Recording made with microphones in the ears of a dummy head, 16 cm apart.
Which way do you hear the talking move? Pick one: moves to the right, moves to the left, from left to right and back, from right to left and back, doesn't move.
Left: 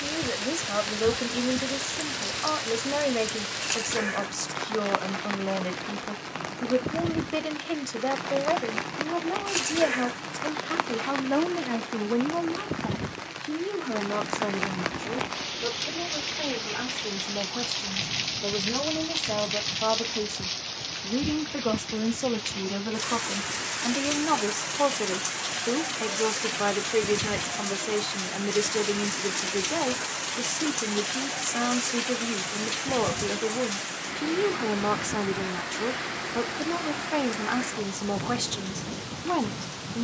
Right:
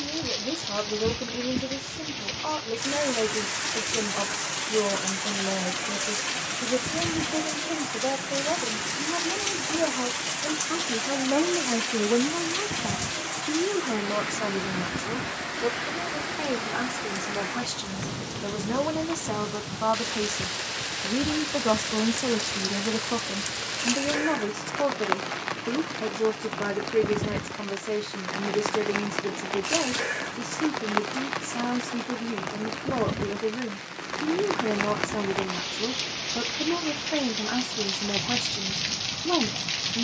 from left to right and back.